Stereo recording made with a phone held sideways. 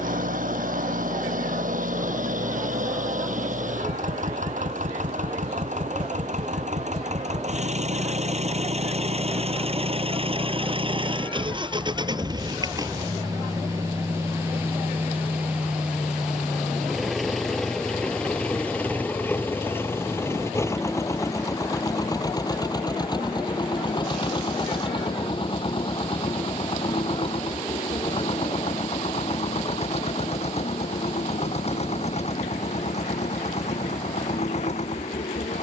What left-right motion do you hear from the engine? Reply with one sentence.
You can hear the engine move from right to left.